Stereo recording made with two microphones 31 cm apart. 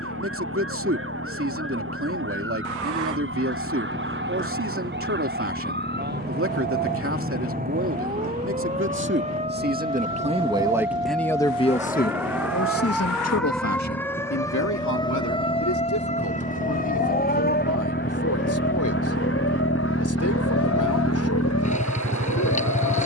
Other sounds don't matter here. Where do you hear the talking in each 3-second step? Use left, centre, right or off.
right, right, right, centre, left, left, left, left.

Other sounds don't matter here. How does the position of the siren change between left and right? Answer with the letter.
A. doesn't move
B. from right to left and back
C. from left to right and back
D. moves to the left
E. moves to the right
D.